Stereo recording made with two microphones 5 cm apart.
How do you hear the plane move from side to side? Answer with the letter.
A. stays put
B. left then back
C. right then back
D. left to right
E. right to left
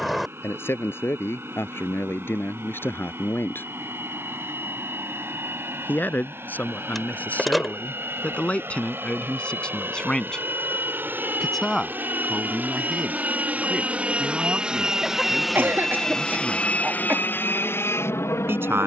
E.